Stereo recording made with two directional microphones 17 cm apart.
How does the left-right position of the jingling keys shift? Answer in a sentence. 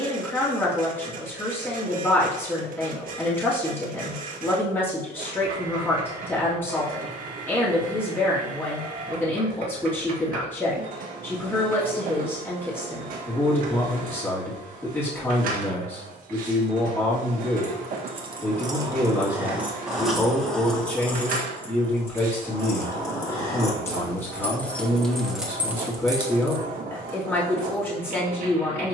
You can hear the jingling keys go left and come back.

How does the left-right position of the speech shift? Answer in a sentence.
You can hear the speech stay in one place.